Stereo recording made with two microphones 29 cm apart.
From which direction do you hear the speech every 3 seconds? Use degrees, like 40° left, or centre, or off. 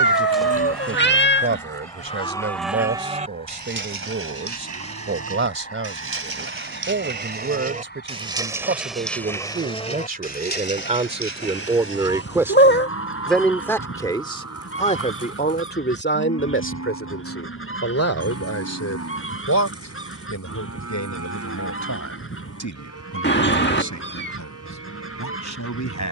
40° right, 40° right, 40° right, 30° right, centre, 40° left, 60° left, 80° left, 80° left.